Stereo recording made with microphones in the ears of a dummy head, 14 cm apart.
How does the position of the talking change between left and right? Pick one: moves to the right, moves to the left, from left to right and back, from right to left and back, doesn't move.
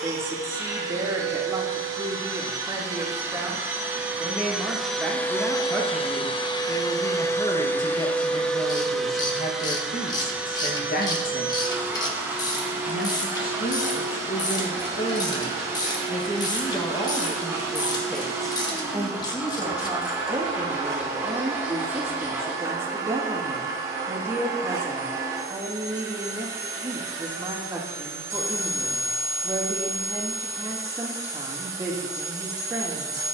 from right to left and back.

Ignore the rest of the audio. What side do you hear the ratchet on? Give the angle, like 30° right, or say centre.
20° left.